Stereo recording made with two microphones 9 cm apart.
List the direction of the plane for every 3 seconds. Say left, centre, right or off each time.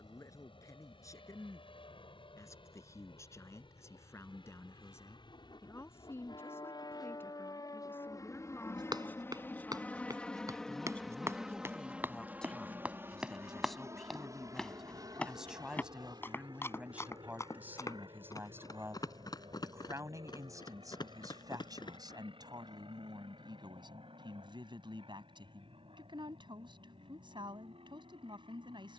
left, left, left, centre, right, right, right, right, right, right.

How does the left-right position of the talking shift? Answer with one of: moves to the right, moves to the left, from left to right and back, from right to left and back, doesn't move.
moves to the right.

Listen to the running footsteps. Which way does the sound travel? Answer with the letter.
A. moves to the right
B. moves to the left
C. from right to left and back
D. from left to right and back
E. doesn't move
B.